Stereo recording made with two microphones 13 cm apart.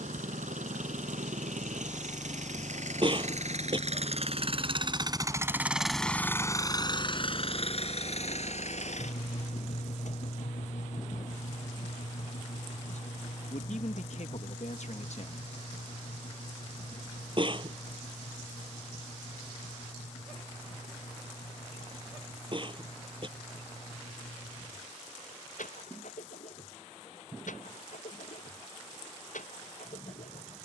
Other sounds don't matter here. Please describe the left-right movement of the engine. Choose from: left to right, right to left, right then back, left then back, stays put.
right to left.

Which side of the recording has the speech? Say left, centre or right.
left.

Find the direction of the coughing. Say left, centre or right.
right.